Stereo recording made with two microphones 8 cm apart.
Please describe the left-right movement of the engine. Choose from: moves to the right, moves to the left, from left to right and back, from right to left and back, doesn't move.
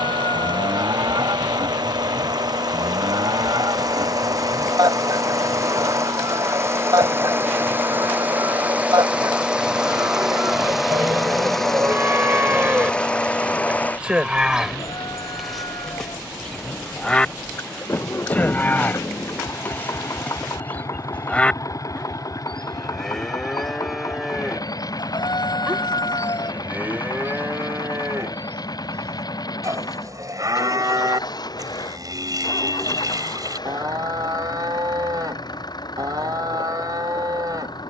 moves to the left.